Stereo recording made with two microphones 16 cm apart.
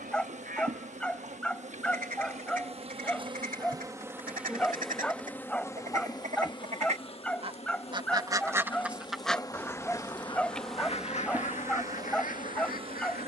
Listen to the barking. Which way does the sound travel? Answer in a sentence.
In this clip you hear the barking stay put.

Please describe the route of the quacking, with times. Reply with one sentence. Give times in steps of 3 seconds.
In this clip you hear the quacking on the right from 0 s and on the left from 9 s.